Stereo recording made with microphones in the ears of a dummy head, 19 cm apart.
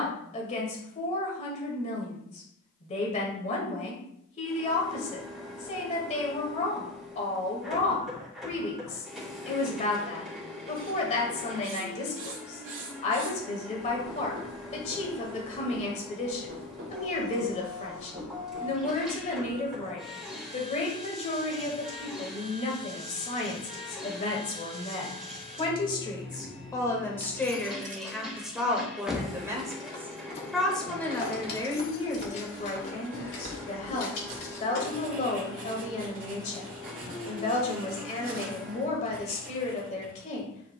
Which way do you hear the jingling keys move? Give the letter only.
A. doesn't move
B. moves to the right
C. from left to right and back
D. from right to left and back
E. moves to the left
E.